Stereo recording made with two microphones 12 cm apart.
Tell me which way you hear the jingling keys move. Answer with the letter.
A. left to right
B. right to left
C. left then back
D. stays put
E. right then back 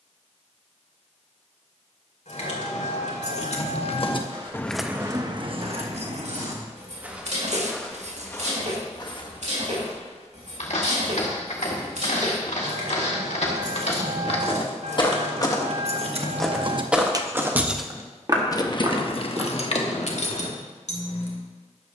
E.